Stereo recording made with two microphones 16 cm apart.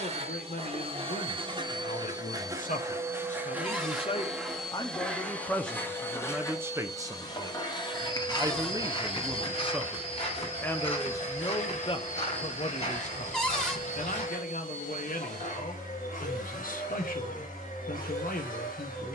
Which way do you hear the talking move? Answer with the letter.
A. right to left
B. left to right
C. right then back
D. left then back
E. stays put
C.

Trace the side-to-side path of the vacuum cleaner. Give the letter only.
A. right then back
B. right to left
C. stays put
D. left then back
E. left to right
B.